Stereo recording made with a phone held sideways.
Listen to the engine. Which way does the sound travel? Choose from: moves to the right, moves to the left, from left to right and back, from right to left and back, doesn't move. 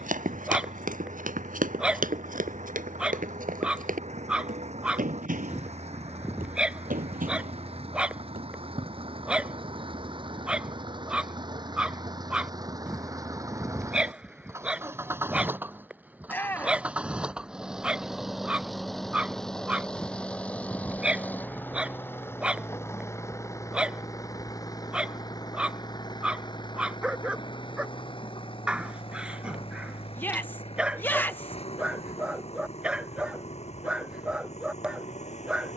moves to the left.